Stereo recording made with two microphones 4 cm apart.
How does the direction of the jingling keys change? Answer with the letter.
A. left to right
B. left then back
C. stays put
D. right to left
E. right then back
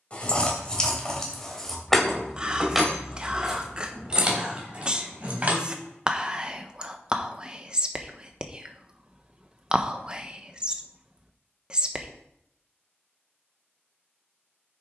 A.